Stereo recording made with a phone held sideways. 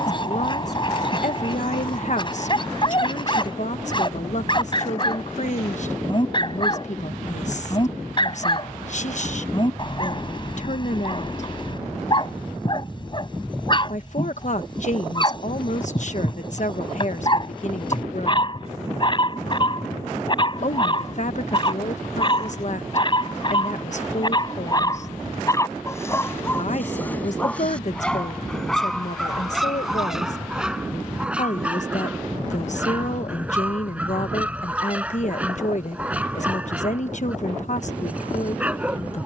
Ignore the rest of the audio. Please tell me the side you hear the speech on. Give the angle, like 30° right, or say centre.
50° left.